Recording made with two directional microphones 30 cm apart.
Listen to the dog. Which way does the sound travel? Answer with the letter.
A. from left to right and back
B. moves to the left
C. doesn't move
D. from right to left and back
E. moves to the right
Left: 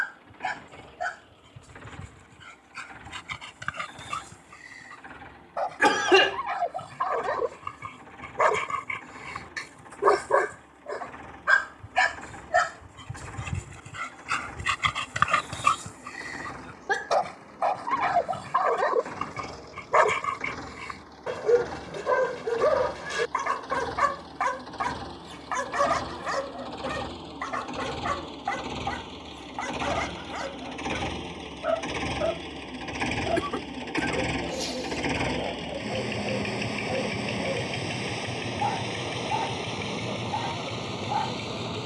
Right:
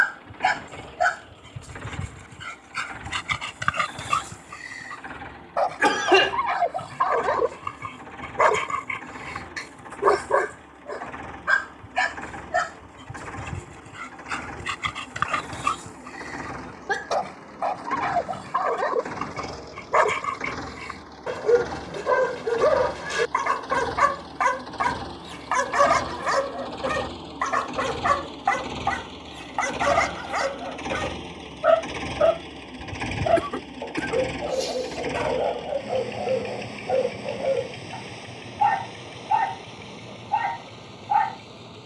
D.